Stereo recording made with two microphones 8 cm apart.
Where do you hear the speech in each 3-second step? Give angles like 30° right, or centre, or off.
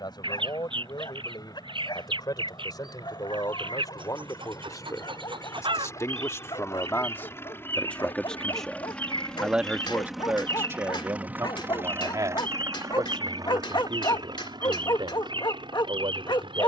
60° left, 50° left, 20° left, 30° right, 60° right, 70° right.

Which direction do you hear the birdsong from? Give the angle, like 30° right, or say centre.
80° right.